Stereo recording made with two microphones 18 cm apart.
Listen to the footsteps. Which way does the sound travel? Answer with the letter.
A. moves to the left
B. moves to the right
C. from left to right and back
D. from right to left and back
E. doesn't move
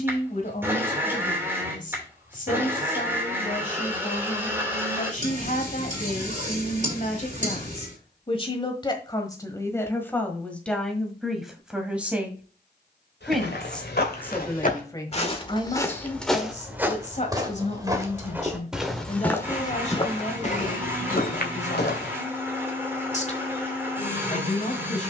C.